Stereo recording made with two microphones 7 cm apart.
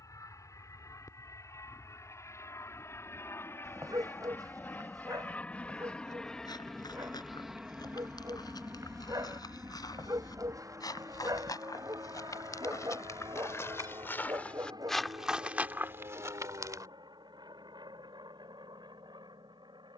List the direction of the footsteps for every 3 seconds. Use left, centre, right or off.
off, off, left, left, left, right, off.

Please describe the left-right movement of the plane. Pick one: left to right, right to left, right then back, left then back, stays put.
left to right.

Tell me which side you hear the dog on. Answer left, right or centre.
right.